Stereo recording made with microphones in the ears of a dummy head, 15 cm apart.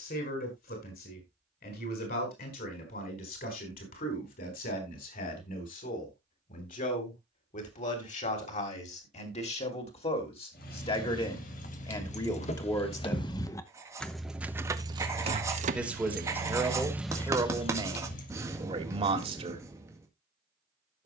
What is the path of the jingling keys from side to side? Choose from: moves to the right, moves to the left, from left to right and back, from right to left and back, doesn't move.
from left to right and back.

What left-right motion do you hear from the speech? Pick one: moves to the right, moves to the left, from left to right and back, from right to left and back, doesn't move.
moves to the right.